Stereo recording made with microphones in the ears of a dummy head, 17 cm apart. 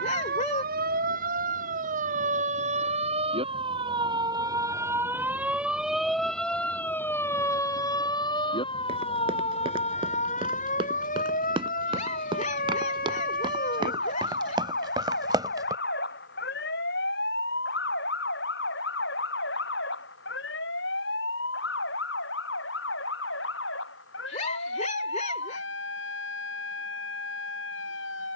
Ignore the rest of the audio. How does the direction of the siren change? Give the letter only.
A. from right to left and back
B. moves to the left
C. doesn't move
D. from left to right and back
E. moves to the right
B.